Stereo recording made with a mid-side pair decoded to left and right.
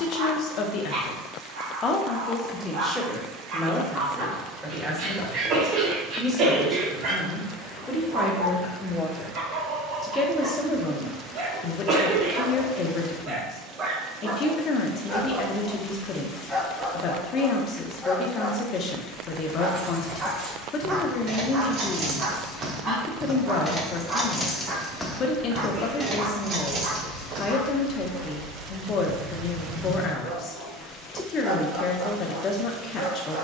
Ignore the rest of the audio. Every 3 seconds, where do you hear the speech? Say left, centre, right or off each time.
left, centre, centre, left, left, left, left, left, left, left, left.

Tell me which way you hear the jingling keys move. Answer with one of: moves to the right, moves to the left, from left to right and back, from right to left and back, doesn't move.
from right to left and back.